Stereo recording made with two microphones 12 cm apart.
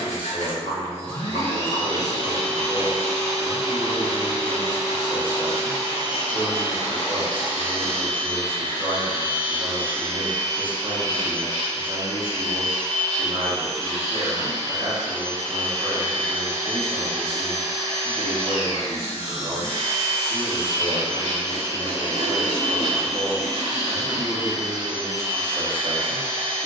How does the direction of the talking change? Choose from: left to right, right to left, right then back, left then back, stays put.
stays put.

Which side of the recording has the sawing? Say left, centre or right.
left.